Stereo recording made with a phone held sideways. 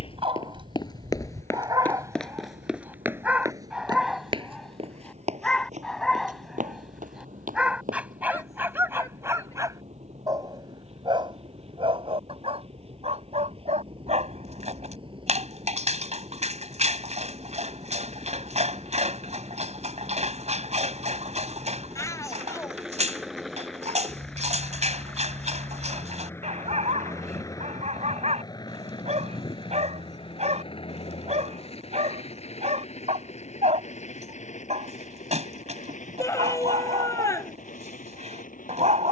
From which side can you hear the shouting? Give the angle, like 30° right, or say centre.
20° left.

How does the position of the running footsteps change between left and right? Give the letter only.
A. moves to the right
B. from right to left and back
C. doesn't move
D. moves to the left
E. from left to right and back
A.